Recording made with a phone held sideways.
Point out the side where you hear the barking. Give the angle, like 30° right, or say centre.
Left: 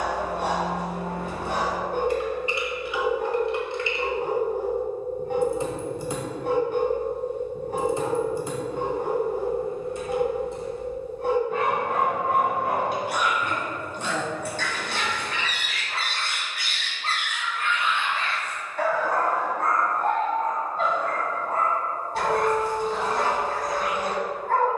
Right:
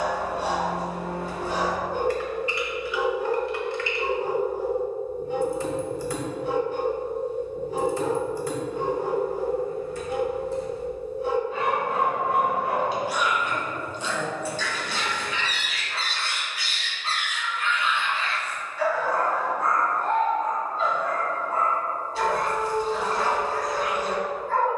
60° left.